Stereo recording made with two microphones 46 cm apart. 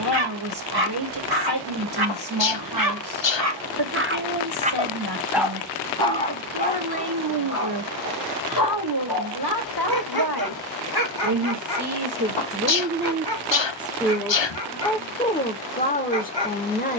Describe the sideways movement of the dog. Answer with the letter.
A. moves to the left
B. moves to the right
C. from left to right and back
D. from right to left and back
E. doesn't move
A.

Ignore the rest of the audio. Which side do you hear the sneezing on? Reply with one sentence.
In this clip you hear the sneezing on the left.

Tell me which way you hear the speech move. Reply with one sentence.
In this clip you hear the speech go from the right side to the left.